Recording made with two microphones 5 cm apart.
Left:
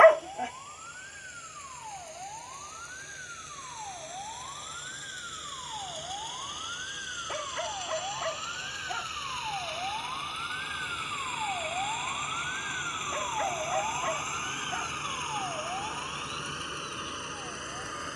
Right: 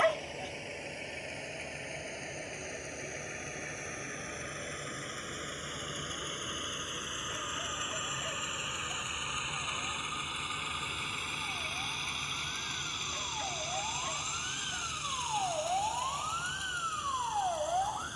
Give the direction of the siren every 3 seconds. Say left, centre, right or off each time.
left, left, left, left, left, right.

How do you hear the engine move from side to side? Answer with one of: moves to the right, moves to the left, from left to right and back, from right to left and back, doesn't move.
moves to the left.